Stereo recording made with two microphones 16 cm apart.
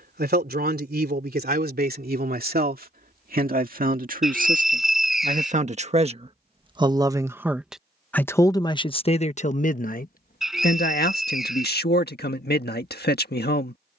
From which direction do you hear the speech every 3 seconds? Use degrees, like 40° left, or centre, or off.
60° right, 50° right, centre, 60° left, 70° left.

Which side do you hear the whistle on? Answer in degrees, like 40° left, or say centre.
centre.